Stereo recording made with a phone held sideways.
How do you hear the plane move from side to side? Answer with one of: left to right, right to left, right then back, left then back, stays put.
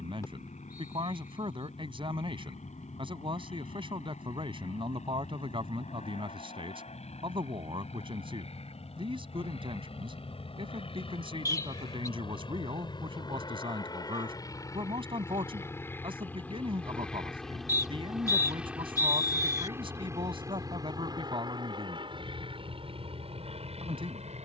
left to right.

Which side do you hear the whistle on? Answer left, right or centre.
left.